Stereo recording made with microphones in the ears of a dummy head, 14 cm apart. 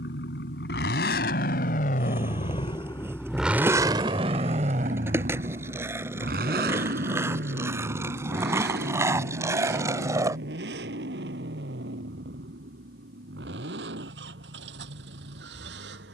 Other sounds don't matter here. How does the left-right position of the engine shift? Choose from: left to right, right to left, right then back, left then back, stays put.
left to right.